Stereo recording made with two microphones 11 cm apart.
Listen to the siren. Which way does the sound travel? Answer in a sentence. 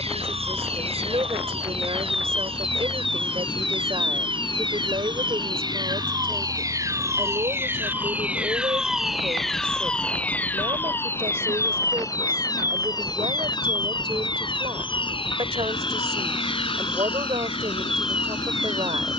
You can hear the siren travel towards the left.